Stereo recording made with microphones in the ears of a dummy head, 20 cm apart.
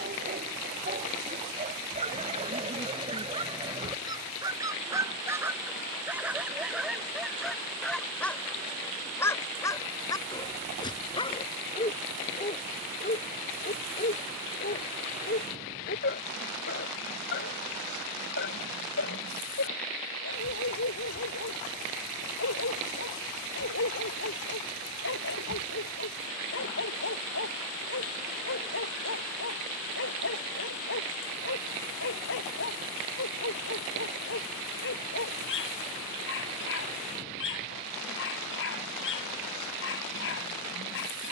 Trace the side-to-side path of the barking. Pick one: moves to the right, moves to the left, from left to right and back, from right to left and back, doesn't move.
moves to the left.